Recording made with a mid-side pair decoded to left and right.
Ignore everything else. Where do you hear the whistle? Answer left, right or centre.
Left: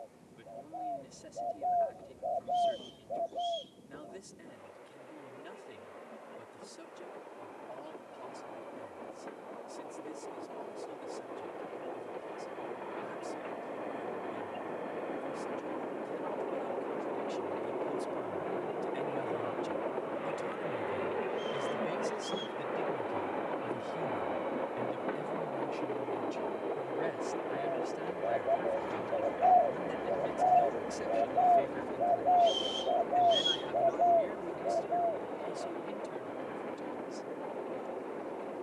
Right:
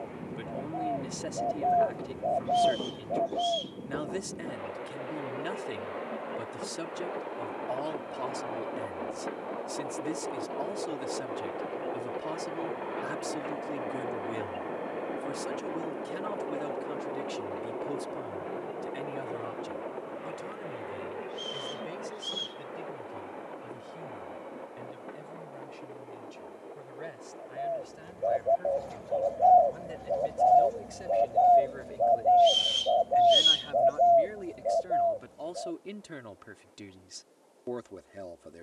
right.